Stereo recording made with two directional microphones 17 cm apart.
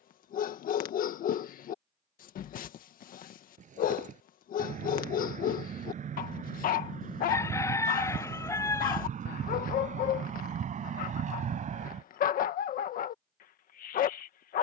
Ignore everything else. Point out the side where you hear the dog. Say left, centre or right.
left.